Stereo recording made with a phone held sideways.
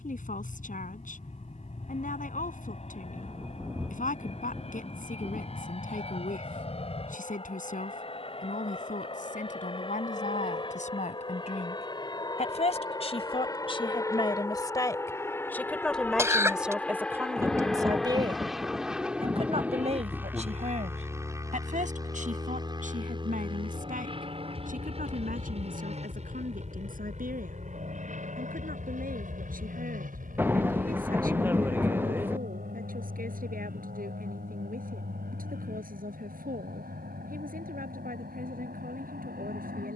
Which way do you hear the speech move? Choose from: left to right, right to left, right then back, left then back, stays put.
left to right.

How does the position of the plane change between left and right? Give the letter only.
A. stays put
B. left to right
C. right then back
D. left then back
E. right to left
B.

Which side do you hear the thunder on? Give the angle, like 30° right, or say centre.
10° right.